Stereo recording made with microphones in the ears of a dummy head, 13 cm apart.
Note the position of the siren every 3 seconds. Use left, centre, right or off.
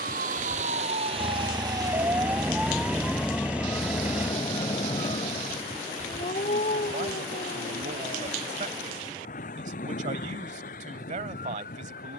right, left, left, left.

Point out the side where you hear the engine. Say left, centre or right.
centre.